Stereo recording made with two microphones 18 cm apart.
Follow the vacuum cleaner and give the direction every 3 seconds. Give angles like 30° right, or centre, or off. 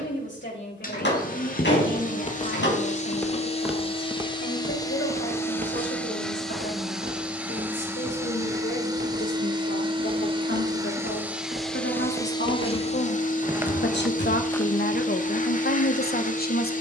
50° left, 20° left, 10° right, 20° right, 40° left, 40° left.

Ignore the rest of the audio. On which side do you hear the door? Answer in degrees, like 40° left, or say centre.
80° left.